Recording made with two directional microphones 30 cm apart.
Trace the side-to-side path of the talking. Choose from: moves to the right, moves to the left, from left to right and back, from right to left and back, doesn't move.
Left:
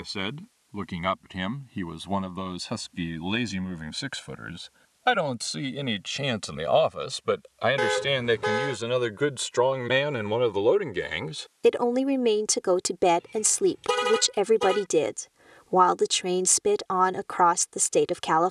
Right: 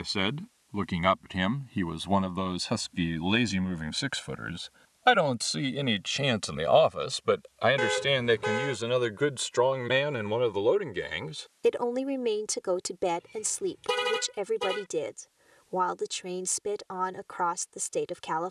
moves to the left.